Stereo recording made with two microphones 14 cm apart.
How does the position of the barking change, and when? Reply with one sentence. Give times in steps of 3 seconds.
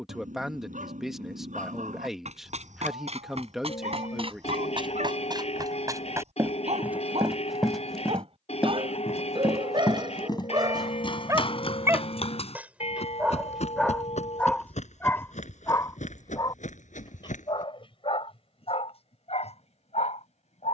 In this clip you hear the barking on the right from 0 s, in the centre from 12 s and on the left from 15 s.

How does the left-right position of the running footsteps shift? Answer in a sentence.
You can hear the running footsteps move from right to left.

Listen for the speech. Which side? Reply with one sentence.
You can hear the speech in the centre.